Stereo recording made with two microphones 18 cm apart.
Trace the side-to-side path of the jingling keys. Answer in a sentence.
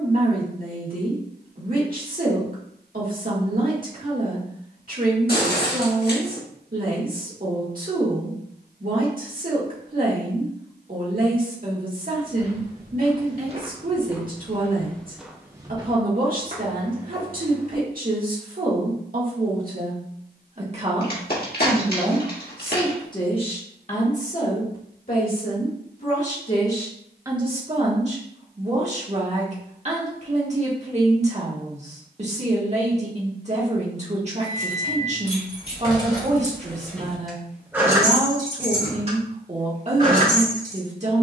In this clip you hear the jingling keys travel towards the right.